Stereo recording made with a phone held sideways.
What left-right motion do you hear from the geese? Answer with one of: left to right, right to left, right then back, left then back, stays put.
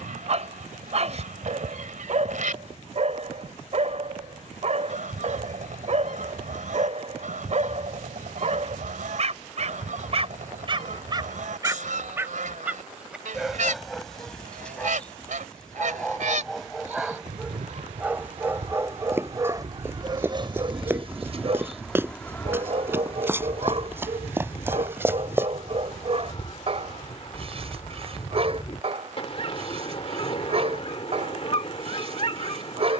right to left.